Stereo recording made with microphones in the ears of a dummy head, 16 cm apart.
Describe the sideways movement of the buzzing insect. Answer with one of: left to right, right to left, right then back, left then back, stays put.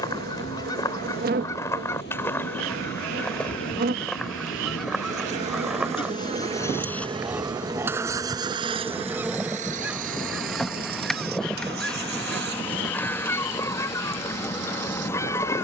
right to left.